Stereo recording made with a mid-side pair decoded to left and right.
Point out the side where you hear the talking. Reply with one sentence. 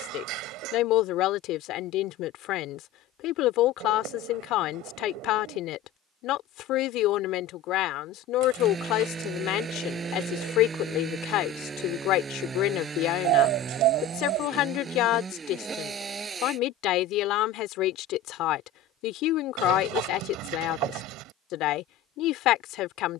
You can hear the talking on the left.